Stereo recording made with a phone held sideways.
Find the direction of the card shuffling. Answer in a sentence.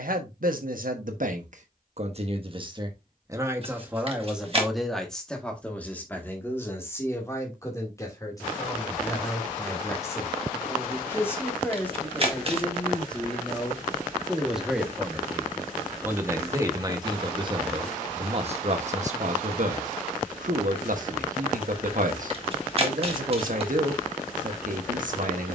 In this clip you hear the card shuffling on the right.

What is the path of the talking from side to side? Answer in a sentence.
You can hear the talking go left and come back.